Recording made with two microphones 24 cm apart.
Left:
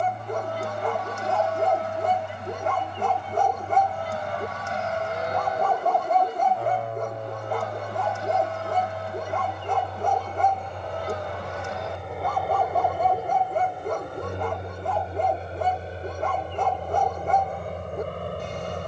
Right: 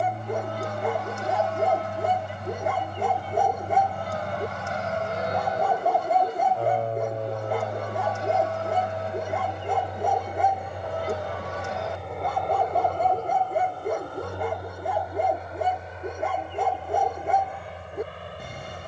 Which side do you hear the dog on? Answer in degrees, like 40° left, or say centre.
10° right.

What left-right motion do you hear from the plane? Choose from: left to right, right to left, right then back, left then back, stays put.
right to left.